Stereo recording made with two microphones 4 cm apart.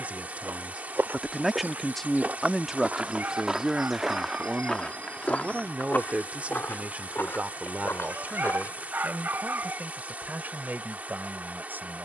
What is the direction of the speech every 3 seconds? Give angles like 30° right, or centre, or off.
10° right, 20° right, 40° right, 40° right.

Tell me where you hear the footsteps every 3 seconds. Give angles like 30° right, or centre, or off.
40° right, 10° left, 60° left, off.